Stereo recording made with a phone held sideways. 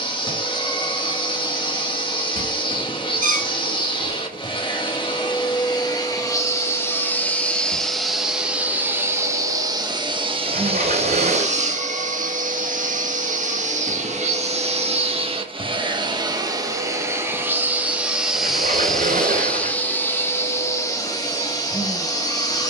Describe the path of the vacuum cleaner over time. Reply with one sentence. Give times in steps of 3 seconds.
You can hear the vacuum cleaner on the left from 0 s, in the centre from 6 s, on the right from 9 s, in the centre from 18 s and on the left from 21 s.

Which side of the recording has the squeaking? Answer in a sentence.
In this clip you hear the squeaking on the right.